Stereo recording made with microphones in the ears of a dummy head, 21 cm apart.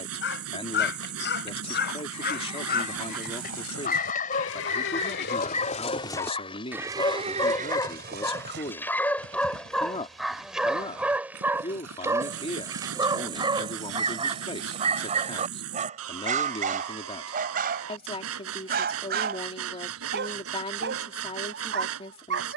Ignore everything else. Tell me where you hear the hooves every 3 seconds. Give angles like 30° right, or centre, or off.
80° left, 60° left, 30° right, 60° right, 70° right, off, off, off.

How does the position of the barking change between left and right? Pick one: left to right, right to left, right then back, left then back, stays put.
left to right.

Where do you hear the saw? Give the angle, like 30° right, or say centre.
70° right.